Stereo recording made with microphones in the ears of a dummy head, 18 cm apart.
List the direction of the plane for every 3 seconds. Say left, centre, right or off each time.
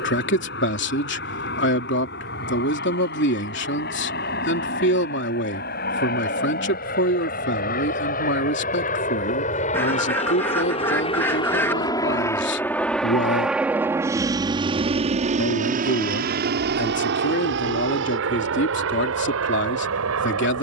left, left, left, left, centre, right, right.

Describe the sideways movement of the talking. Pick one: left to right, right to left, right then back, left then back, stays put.
stays put.